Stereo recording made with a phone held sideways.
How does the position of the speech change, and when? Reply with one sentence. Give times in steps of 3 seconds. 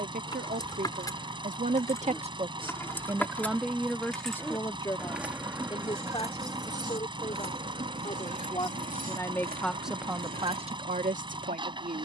In this clip you hear the speech on the right from 0 s, in the centre from 3 s, on the left from 6 s and on the right from 9 s.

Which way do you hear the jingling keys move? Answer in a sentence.
In this clip you hear the jingling keys move to the right.